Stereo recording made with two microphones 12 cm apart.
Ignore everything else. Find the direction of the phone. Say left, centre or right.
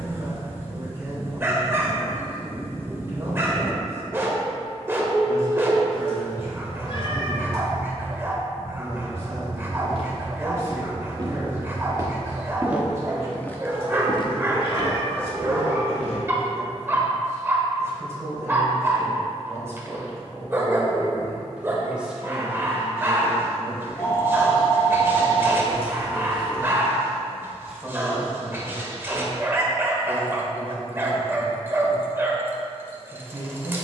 left.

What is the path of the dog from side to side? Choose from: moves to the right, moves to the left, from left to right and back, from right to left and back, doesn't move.
doesn't move.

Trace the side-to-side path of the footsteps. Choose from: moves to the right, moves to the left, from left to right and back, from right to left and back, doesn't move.
moves to the left.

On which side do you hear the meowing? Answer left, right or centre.
left.